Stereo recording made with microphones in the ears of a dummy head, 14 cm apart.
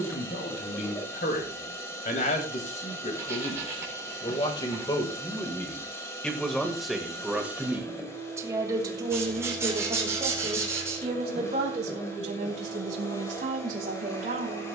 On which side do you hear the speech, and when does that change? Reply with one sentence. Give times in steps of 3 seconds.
You can hear the speech on the left from 0 s, in the centre from 6 s and on the right from 9 s.